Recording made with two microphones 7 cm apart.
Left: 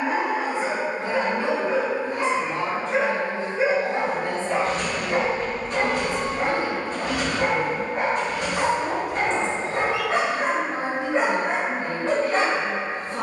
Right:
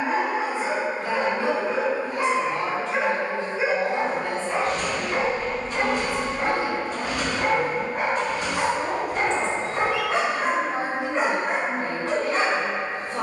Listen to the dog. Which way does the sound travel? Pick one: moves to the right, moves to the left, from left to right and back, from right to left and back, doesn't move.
doesn't move.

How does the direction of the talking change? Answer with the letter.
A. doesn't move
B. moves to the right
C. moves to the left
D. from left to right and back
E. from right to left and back
A.